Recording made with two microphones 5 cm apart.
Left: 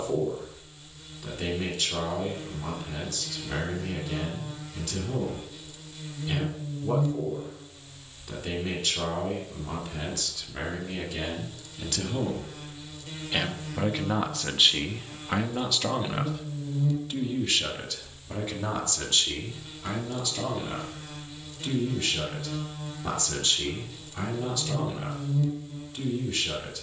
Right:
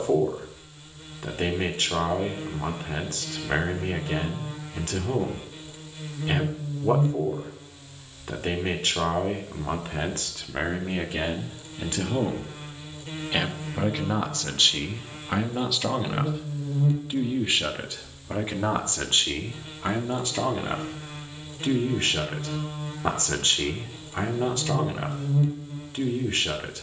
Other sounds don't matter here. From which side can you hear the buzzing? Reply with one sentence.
You can hear the buzzing on the right.